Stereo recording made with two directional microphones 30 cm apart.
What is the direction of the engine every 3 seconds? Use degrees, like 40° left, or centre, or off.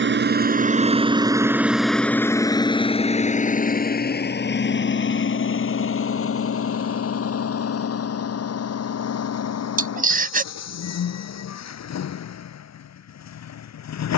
10° right, 30° left, 50° left, 60° left, 60° left.